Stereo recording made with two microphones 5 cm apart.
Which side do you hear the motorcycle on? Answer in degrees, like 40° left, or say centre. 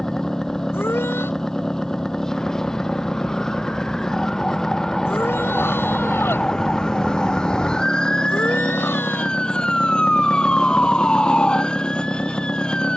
10° left.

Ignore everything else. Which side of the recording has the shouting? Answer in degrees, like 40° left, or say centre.
50° left.